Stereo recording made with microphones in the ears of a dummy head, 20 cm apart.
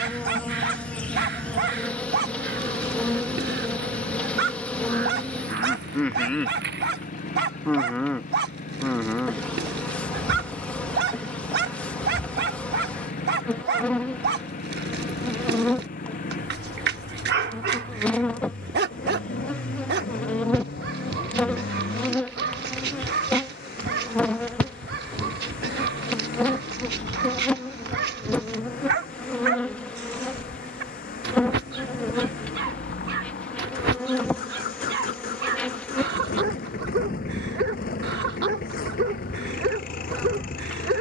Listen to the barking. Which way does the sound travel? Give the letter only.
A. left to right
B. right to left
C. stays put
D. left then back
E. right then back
C.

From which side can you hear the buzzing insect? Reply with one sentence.
You can hear the buzzing insect in the centre.